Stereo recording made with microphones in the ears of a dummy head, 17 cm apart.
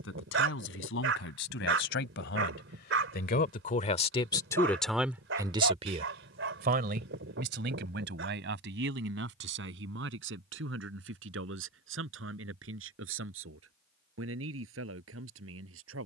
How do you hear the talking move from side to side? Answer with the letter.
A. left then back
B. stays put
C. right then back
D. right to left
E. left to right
E.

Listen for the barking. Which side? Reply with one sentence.
You can hear the barking on the right.